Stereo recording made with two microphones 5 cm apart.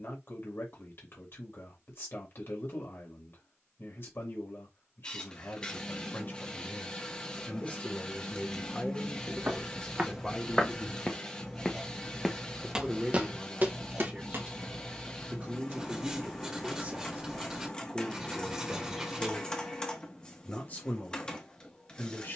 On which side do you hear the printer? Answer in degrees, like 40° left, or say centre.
20° left.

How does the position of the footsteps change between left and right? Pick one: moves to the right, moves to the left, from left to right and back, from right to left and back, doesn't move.
from right to left and back.